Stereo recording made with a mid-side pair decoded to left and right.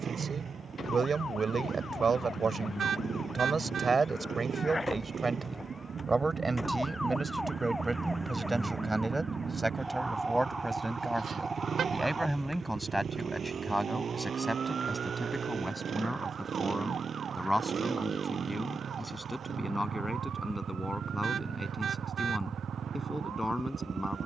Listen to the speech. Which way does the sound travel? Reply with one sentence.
In this clip you hear the speech move from right to left.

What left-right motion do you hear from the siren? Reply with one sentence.
You can hear the siren move from left to right.